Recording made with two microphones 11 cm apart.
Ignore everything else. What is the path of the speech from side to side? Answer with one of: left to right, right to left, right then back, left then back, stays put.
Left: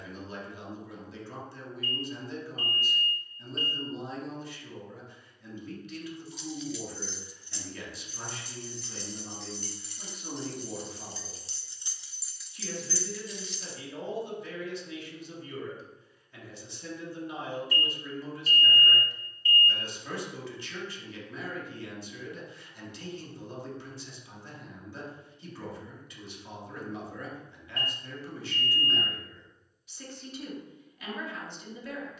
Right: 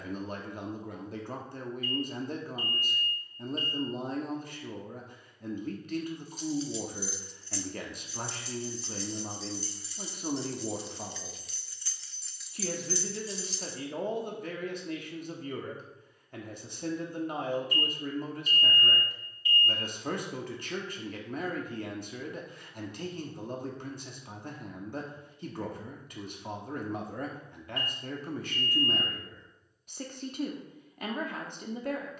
stays put.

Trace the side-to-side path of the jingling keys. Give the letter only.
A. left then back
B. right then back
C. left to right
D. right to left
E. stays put
A.